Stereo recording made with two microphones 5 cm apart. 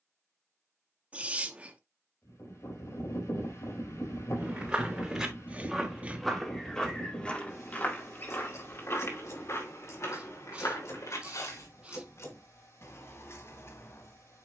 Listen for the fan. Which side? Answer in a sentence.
You can hear the fan on the left.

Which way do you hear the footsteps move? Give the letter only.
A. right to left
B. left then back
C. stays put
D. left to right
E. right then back
A.